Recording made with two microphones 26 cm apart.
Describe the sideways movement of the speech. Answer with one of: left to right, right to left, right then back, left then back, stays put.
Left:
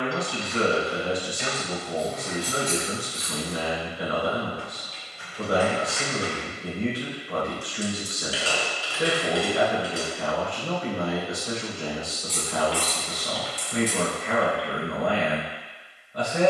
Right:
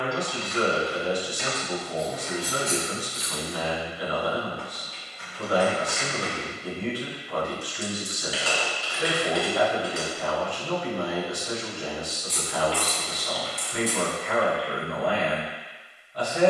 stays put.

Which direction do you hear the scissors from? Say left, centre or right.
right.